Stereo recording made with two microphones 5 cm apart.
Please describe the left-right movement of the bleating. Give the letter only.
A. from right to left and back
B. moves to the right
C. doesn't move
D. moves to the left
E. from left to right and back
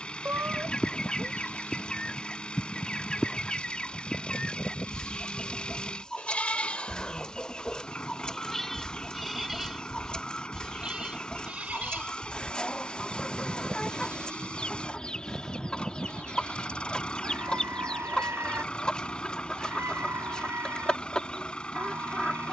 B.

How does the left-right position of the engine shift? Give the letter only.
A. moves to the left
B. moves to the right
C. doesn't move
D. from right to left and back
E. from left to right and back
C.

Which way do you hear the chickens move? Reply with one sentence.
In this clip you hear the chickens stay in one place.